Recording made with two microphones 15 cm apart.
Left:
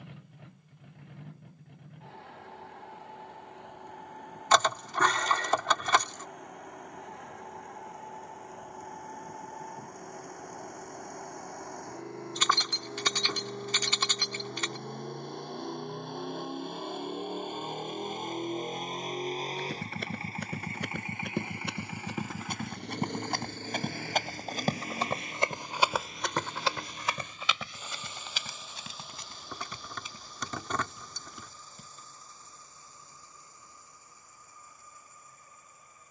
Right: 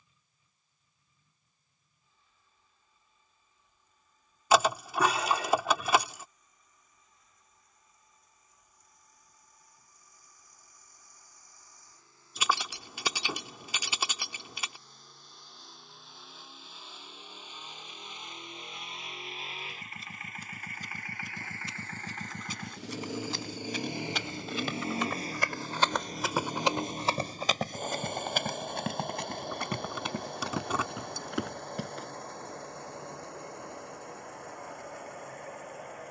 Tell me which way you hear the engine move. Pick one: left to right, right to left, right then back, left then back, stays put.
left to right.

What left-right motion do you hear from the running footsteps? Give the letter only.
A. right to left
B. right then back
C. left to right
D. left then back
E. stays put
C.